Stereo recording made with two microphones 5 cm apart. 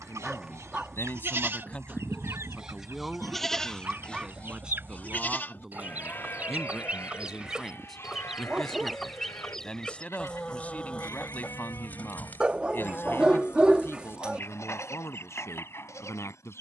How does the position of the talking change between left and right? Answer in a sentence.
You can hear the talking go right and come back.